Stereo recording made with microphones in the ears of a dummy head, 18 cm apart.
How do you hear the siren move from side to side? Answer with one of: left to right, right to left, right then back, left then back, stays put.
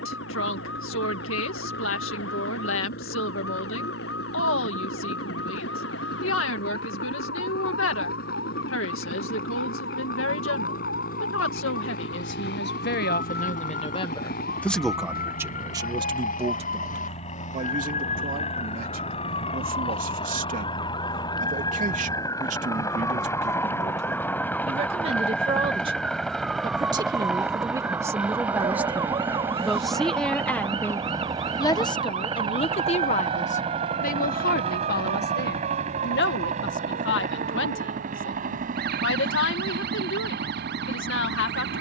left to right.